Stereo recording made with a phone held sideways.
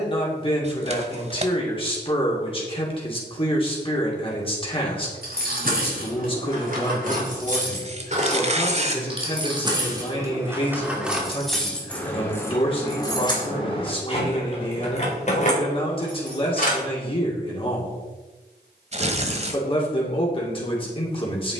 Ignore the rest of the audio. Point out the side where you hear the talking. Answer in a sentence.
You can hear the talking on the left.